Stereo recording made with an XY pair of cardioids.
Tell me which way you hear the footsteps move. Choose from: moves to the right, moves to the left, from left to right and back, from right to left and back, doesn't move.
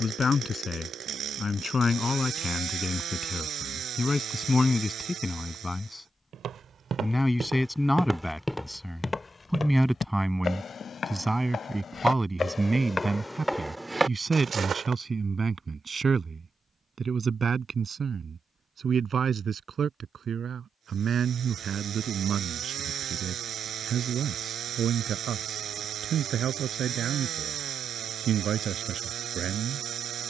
from right to left and back.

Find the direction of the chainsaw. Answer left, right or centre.
right.